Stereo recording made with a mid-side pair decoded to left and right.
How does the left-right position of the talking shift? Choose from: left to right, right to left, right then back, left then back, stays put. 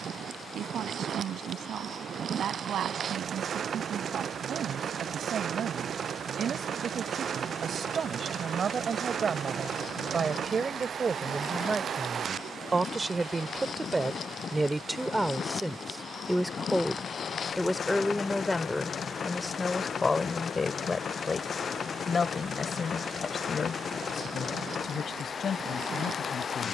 right to left.